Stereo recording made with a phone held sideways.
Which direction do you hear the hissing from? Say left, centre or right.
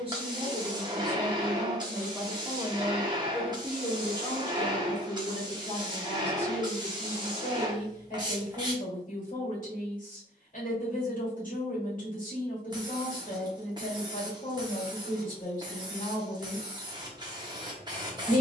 right.